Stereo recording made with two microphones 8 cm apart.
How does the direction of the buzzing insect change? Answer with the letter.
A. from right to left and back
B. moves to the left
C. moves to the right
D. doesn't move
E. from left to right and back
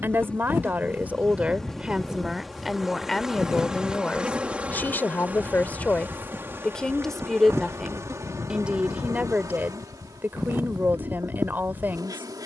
C.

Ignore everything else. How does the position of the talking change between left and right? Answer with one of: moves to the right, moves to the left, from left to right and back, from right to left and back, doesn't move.
from right to left and back.